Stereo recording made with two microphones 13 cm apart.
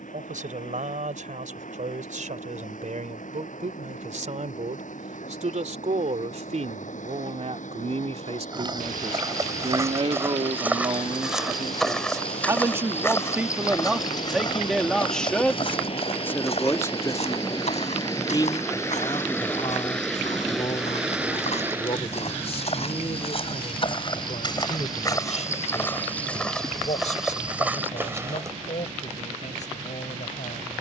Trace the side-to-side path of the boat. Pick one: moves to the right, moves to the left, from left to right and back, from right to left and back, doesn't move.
moves to the right.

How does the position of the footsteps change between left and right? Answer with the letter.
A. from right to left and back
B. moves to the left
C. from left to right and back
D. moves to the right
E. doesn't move
A.